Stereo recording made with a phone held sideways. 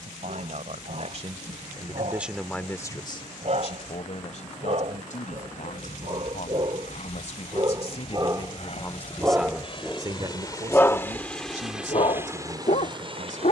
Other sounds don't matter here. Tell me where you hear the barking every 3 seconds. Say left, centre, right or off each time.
right, right, right, centre, left.